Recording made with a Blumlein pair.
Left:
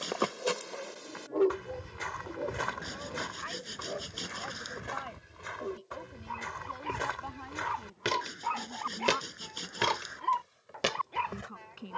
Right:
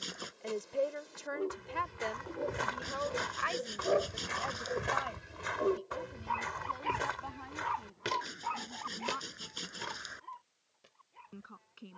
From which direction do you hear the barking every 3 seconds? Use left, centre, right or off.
left, right, centre, left.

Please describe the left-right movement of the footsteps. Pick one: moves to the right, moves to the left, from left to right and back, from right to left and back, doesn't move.
from left to right and back.